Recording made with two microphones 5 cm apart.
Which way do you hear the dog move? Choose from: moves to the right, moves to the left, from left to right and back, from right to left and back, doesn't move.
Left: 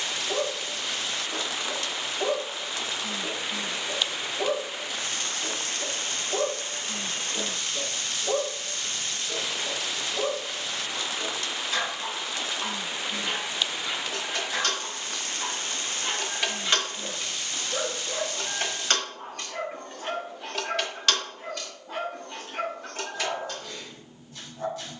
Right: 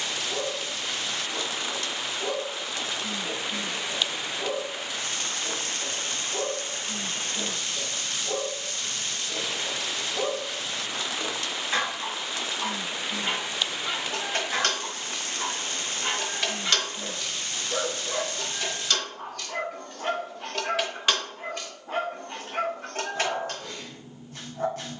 moves to the right.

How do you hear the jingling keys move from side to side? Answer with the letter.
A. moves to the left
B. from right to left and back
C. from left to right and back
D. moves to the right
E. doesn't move
B.